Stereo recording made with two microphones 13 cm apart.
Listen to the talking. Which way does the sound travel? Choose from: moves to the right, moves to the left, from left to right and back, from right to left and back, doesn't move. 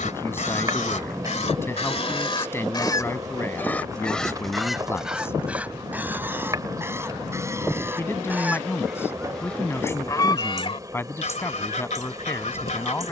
doesn't move.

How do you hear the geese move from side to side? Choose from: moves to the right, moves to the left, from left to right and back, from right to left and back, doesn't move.
from left to right and back.